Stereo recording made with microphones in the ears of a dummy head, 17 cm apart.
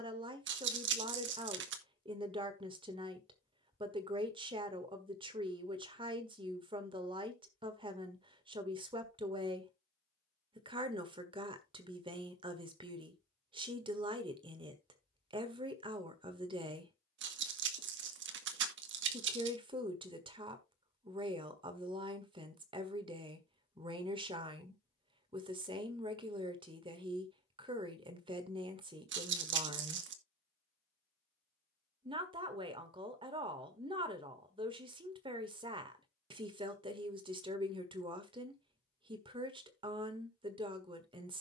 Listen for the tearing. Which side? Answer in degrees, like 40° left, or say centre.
70° right.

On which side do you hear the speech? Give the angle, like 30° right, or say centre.
30° right.